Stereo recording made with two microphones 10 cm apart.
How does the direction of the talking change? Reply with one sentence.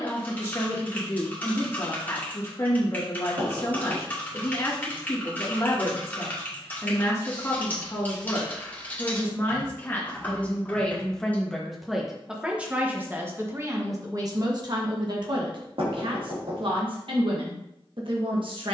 In this clip you hear the talking go from the left side to the right.